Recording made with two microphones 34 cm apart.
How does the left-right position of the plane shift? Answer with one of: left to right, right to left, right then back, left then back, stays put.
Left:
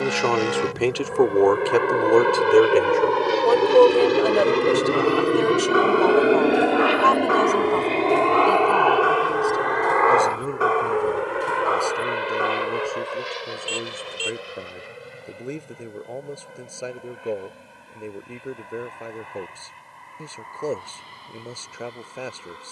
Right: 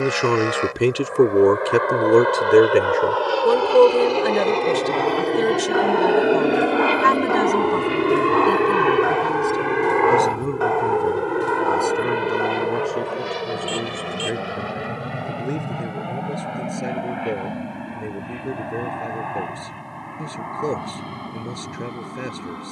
left to right.